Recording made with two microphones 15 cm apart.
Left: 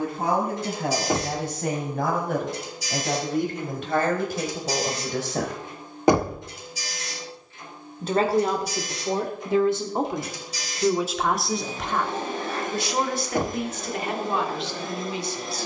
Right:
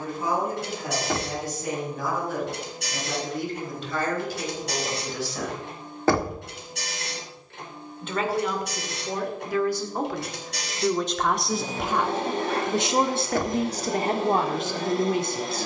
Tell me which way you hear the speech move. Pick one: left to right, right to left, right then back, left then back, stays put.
left to right.